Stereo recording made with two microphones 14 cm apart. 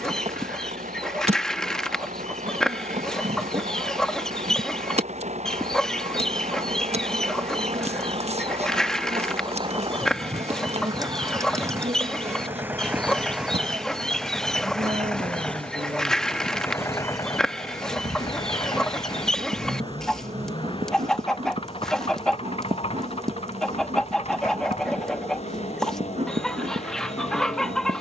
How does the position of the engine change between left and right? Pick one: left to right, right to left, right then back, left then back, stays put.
right to left.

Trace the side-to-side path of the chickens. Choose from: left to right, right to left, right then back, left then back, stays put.
stays put.